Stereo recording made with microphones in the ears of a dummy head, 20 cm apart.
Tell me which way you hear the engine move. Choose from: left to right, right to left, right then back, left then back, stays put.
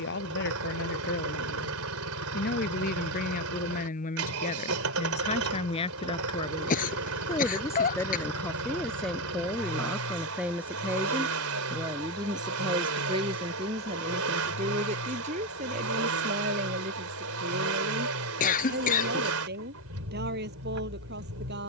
stays put.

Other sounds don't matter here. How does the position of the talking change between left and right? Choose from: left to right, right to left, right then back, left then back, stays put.
left to right.